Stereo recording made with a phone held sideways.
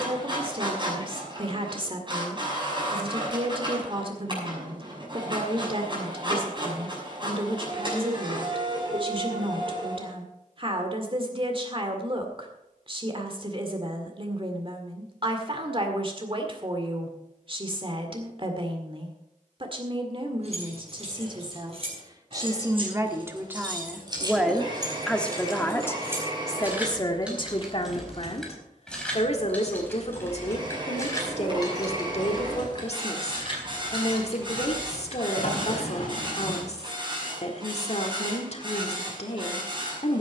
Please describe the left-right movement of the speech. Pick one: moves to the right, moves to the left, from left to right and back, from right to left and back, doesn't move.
moves to the left.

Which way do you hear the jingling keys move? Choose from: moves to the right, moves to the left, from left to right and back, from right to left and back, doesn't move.
moves to the left.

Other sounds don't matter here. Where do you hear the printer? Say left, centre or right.
right.